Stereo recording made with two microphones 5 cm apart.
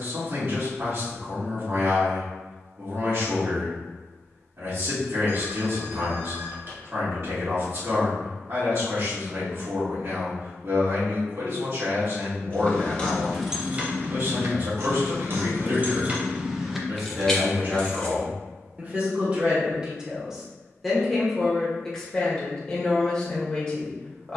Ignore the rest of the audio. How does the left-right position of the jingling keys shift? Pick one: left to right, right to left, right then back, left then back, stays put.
right then back.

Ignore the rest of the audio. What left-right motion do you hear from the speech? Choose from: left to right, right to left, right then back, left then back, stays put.
right to left.